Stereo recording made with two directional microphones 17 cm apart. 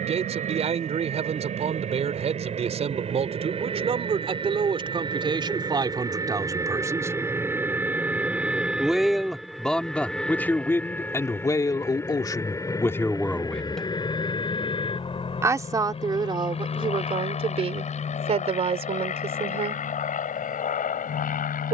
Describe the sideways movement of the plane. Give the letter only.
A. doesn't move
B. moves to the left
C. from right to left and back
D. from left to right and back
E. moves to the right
B.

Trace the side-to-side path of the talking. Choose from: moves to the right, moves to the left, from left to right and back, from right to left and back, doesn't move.
from right to left and back.